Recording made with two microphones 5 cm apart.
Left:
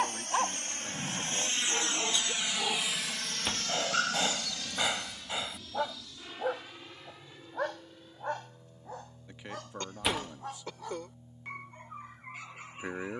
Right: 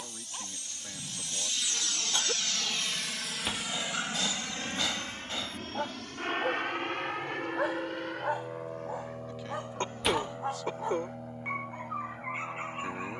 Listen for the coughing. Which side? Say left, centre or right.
right.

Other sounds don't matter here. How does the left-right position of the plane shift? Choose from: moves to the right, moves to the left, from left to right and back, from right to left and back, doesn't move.
moves to the right.